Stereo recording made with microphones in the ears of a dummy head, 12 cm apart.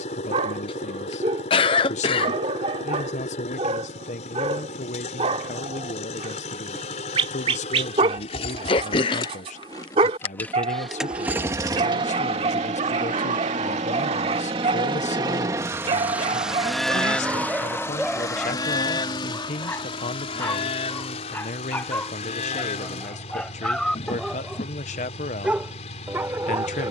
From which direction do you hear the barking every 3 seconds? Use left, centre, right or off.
right, right, right, right, right, right, centre, centre, centre.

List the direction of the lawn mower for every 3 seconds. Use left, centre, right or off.
left, left, left, centre, right, centre, left, left, left.